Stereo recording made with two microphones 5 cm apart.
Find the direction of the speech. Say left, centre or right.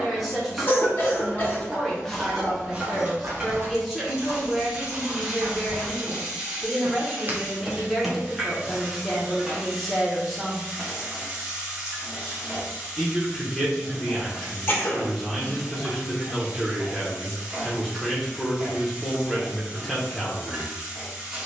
centre.